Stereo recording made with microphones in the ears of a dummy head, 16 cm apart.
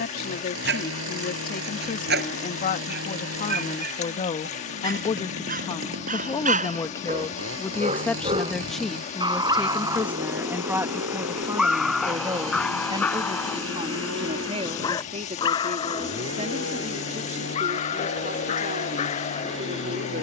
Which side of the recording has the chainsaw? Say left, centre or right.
right.